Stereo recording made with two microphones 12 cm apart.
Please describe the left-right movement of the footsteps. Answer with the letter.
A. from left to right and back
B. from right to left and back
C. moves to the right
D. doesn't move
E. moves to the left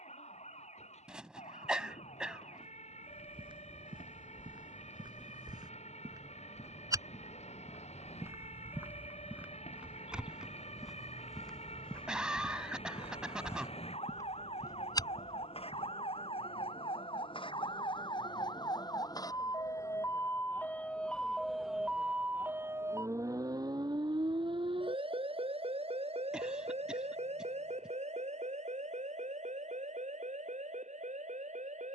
E.